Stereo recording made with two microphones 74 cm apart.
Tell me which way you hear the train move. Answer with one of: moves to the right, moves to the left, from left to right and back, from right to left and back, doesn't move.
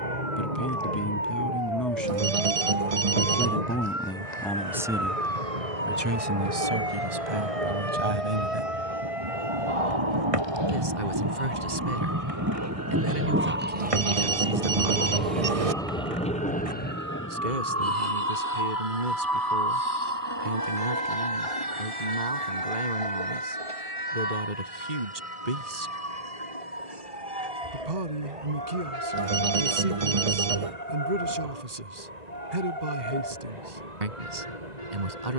moves to the left.